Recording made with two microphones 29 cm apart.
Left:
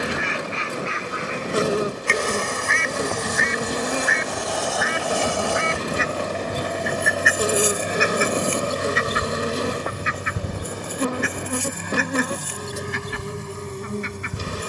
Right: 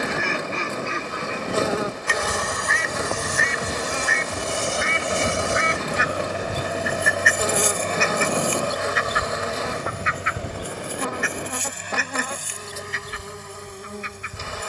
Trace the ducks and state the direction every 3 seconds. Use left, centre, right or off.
right, right, centre, left, left.